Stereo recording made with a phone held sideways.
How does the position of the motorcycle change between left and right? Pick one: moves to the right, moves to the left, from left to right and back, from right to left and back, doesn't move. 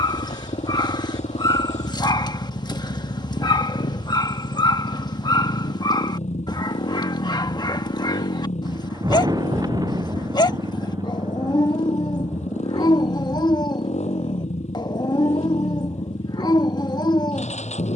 doesn't move.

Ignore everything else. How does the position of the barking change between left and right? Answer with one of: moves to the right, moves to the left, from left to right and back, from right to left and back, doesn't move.
doesn't move.